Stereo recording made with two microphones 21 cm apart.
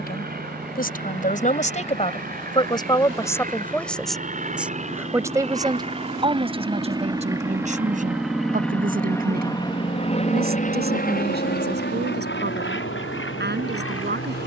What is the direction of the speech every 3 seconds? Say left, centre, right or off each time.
left, centre, right, right, right.